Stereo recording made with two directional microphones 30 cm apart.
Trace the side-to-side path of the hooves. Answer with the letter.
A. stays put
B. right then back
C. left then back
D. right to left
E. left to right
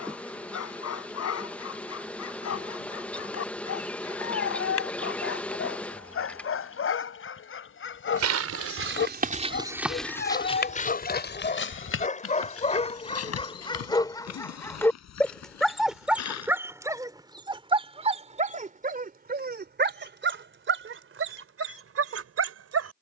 D.